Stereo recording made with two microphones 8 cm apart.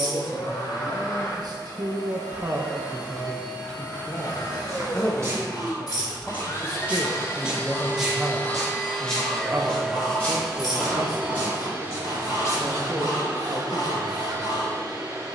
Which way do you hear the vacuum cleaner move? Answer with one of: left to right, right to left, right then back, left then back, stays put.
left to right.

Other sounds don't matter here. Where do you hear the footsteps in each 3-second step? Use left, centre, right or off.
off, right, centre, left, left.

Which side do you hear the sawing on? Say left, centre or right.
left.